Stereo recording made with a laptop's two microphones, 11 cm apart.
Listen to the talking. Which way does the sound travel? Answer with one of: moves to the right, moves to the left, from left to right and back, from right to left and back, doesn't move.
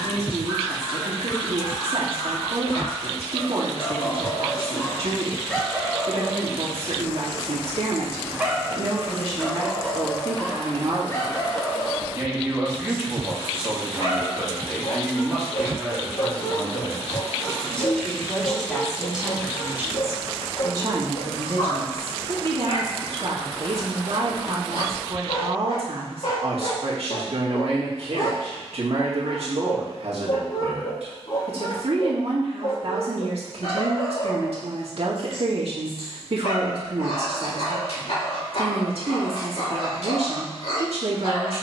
from right to left and back.